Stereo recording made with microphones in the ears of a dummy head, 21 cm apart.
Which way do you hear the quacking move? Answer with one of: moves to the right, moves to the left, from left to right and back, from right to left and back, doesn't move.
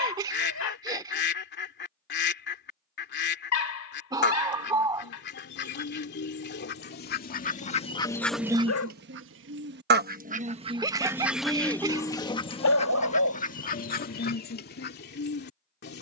from left to right and back.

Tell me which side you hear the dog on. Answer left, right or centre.
left.